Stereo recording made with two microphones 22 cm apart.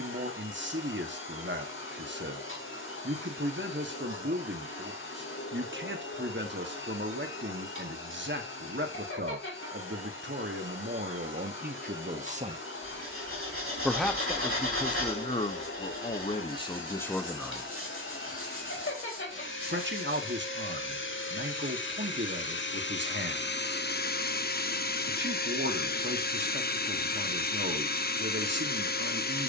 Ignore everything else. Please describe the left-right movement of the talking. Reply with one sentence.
You can hear the talking go left and come back.